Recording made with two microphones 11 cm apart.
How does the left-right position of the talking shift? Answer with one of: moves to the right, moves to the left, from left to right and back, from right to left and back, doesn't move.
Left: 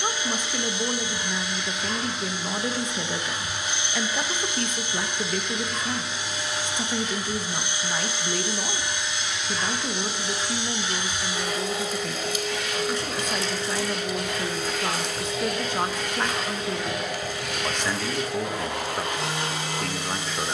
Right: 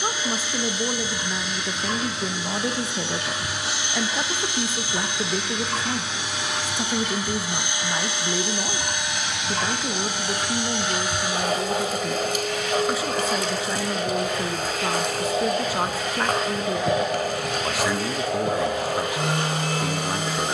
doesn't move.